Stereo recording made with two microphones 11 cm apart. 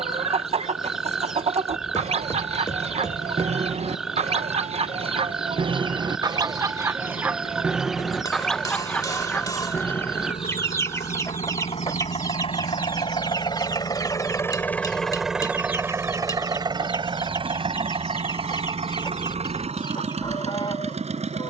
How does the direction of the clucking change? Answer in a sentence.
You can hear the clucking move from right to left.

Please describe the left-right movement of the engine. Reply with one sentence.
In this clip you hear the engine go from the left side to the right.